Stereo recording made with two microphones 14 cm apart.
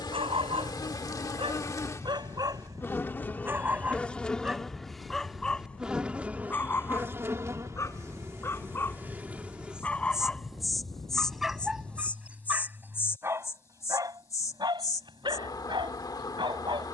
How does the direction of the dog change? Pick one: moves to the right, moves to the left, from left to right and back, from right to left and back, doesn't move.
from right to left and back.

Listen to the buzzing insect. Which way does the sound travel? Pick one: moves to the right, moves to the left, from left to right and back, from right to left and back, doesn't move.
from left to right and back.